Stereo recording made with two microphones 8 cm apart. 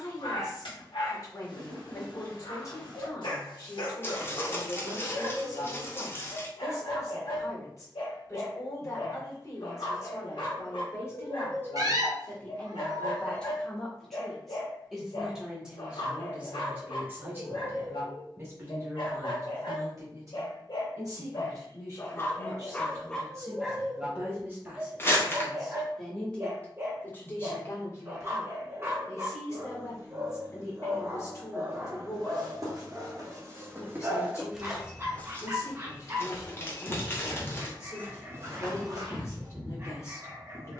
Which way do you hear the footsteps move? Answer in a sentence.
In this clip you hear the footsteps go left and come back.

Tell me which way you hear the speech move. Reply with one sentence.
You can hear the speech move from left to right and back again.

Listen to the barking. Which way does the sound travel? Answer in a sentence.
You can hear the barking travel towards the right.